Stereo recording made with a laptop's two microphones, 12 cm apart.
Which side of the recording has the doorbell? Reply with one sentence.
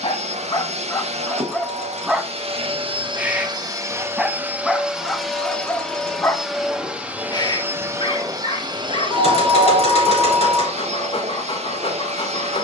You can hear the doorbell on the left.